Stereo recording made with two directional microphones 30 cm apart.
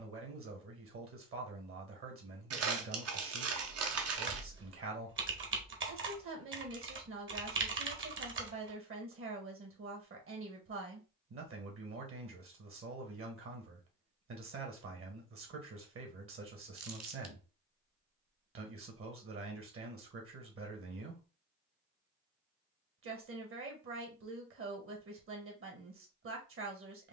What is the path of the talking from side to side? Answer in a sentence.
In this clip you hear the talking stay in one place.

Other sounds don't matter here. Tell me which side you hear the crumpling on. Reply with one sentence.
You can hear the crumpling on the right.